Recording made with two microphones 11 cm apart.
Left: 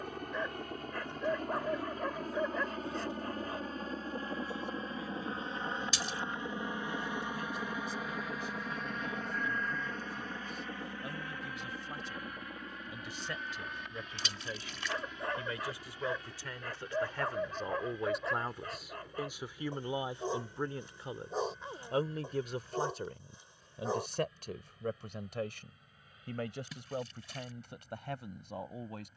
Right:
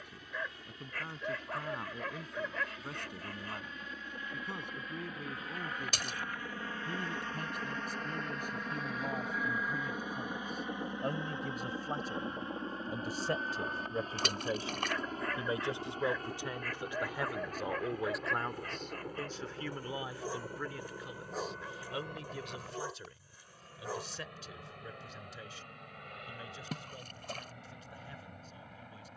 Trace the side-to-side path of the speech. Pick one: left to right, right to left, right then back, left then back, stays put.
right to left.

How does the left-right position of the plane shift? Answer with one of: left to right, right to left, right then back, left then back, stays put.
left to right.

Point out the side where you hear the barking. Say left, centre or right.
left.